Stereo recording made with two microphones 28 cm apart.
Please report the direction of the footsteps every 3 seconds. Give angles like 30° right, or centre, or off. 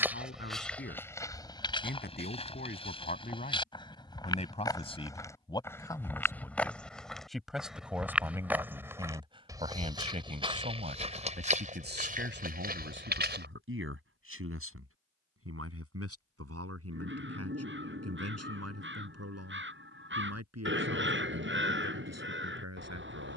10° left, 10° left, centre, 20° right, 40° right, off, off, off.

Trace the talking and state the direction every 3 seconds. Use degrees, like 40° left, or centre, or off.
40° left, 20° left, centre, 30° right, 50° right, 60° right, 70° right, 80° right.